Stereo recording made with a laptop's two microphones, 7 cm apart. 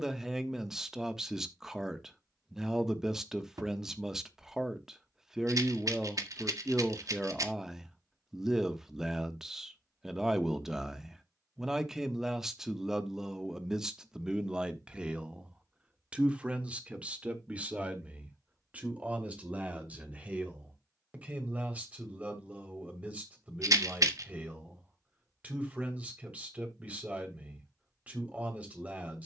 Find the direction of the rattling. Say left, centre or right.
right.